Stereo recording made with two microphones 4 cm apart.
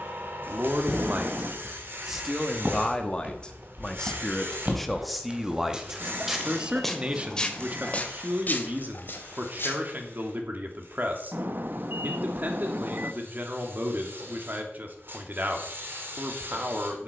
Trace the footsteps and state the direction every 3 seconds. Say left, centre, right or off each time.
right, right, left, left, off, off.